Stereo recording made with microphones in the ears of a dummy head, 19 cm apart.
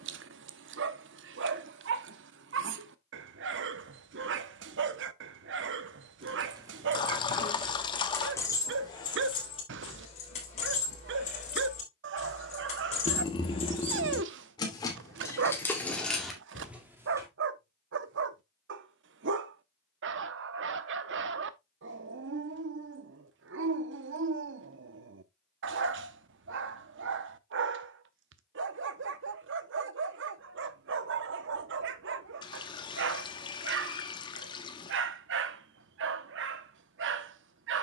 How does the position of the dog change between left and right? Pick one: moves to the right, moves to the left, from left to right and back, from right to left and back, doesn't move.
doesn't move.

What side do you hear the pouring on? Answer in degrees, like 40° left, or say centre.
20° left.